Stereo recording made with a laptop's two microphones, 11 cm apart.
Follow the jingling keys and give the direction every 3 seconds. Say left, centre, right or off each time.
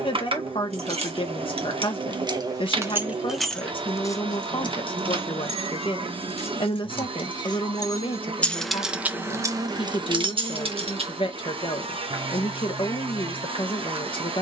right, left, left, right, off.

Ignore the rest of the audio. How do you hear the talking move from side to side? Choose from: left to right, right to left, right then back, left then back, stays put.
stays put.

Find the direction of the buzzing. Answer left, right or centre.
right.